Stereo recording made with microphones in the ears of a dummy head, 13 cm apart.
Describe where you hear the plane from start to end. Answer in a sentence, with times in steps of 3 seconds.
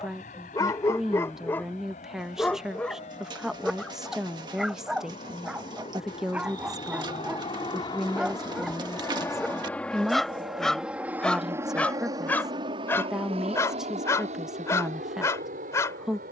In this clip you hear the plane on the left from 0 s, in the centre from 9 s and on the right from 12 s.